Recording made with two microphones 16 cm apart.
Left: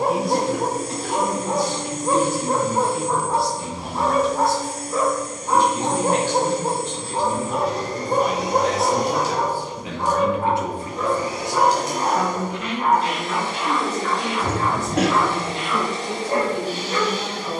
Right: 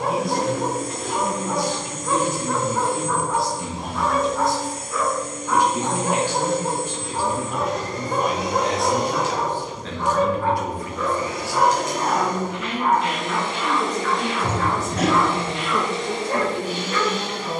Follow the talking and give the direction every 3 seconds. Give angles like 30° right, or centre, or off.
20° right, 20° right, 10° right, 20° left, 10° right, 20° right.